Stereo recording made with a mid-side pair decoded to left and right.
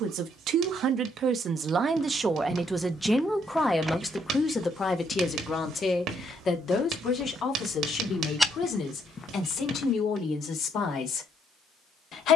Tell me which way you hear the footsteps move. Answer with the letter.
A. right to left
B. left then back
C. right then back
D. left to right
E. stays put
C.